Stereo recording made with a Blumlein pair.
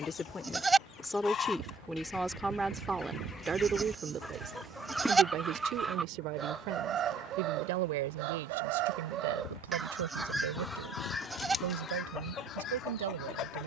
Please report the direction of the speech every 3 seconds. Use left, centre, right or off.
centre, right, right, right, right.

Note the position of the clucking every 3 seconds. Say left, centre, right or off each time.
left, centre, right, centre, left.